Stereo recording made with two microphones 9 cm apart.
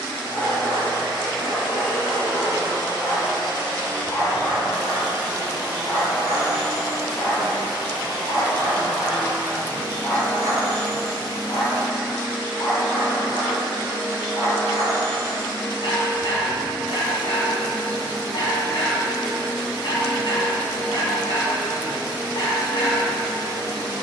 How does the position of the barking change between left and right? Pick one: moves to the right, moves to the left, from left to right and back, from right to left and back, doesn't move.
doesn't move.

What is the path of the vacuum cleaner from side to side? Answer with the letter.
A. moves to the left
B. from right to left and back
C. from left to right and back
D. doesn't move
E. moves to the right
D.